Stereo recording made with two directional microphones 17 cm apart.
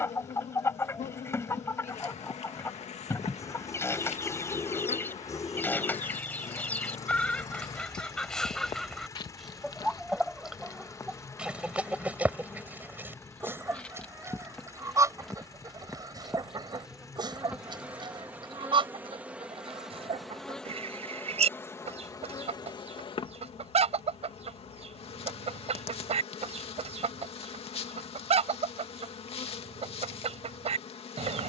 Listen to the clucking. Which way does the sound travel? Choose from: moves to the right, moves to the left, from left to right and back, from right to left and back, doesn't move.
moves to the right.